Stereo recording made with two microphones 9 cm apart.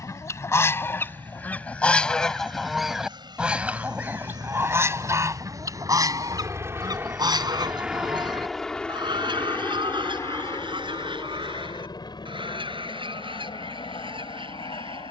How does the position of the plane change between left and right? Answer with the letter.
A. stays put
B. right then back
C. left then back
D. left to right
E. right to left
E.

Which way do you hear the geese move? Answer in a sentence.
You can hear the geese move to the right.